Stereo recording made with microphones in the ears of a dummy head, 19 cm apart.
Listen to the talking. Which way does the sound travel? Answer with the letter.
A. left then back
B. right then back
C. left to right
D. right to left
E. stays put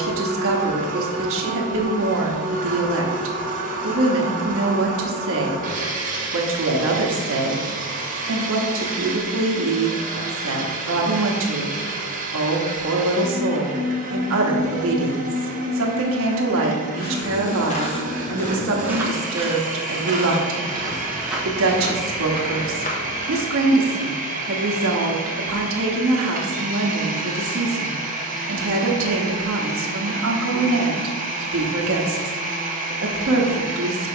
E.